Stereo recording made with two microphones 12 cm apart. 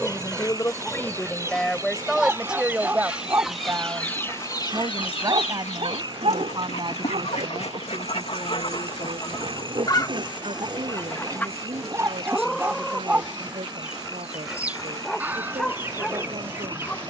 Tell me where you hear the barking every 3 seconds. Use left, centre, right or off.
centre, right, right, right, centre, centre.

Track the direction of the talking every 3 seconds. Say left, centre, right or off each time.
centre, right, right, right, right, right.